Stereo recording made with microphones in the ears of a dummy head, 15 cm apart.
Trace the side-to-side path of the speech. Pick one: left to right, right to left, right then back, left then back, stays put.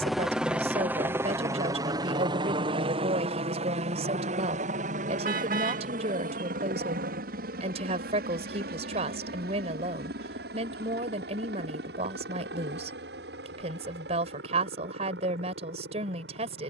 stays put.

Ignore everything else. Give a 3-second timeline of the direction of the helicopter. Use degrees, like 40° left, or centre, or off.
20° right, 40° right, 60° right, 60° right, 70° right, 70° right.